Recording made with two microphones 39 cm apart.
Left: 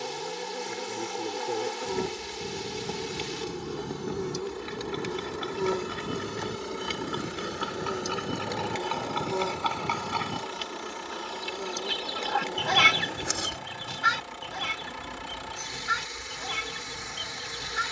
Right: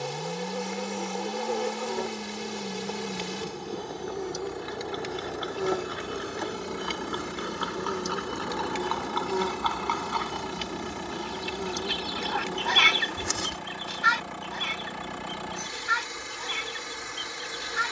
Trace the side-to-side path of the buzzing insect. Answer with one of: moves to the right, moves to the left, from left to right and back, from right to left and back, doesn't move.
from left to right and back.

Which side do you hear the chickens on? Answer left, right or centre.
left.